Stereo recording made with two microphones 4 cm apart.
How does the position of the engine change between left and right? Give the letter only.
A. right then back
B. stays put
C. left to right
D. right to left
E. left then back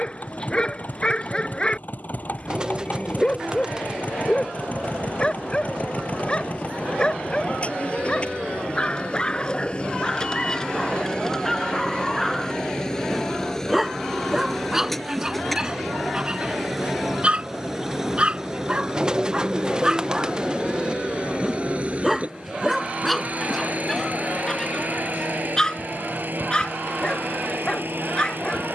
C.